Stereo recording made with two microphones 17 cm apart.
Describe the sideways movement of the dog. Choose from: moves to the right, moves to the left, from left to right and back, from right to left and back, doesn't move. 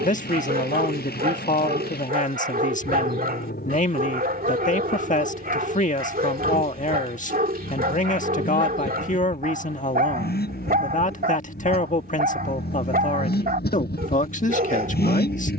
doesn't move.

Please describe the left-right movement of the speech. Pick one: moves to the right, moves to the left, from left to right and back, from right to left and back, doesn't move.
doesn't move.